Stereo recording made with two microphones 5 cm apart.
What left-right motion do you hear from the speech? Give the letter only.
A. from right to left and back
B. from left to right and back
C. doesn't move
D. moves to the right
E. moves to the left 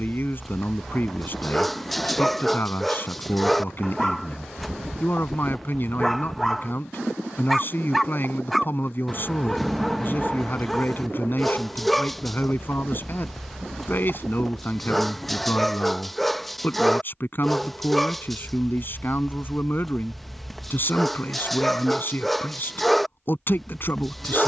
C.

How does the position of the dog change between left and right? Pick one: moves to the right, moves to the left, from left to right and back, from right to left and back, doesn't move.
doesn't move.